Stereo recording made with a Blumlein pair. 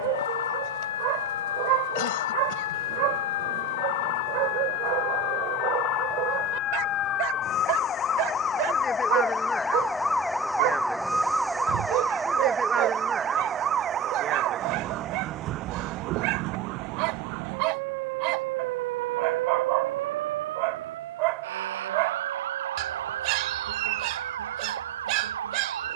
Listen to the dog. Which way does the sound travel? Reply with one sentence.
In this clip you hear the dog stay in one place.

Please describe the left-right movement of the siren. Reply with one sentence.
You can hear the siren move to the right.